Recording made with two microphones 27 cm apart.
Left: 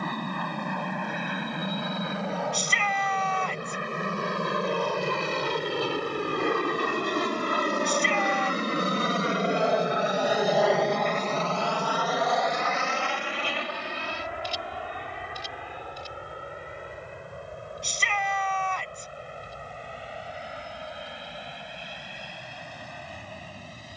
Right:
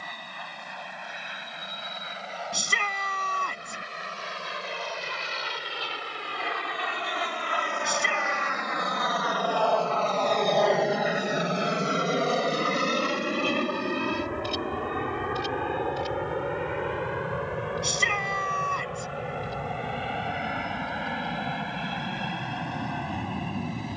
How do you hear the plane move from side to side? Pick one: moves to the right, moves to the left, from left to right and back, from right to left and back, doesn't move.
moves to the right.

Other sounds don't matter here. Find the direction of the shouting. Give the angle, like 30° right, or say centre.
50° right.